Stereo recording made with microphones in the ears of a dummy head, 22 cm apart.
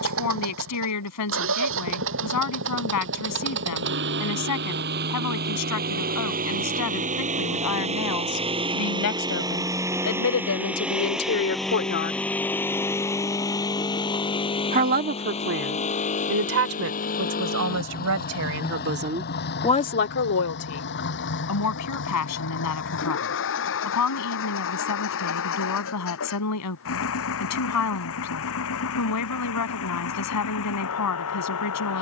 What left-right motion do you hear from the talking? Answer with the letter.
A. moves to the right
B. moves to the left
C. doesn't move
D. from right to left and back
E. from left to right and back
E.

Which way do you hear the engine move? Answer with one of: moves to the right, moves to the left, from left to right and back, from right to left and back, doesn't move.
moves to the left.